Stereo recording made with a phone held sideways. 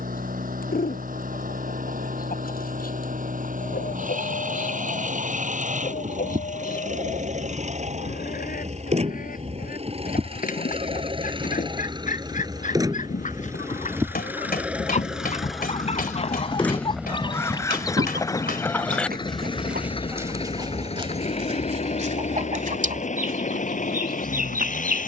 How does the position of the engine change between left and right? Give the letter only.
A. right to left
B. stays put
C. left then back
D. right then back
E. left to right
A.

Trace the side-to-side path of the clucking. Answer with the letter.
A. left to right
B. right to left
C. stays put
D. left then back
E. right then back
A.